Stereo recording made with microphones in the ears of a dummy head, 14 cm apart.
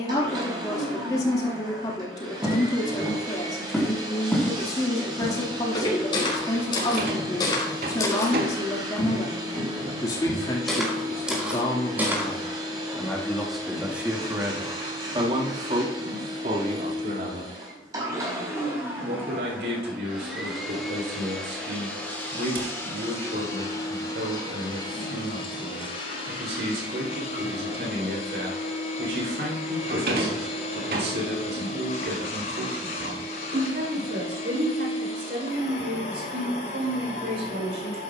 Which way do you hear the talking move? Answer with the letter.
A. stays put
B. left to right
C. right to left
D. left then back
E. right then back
B.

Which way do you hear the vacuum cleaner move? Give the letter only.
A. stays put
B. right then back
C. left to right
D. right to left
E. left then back
D.